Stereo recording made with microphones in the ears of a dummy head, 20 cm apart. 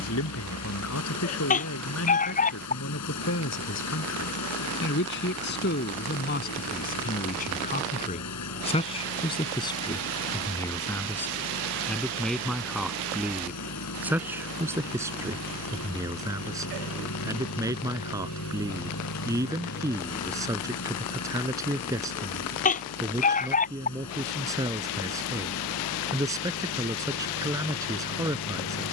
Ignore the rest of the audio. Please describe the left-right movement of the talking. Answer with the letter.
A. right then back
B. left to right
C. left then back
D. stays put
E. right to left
B.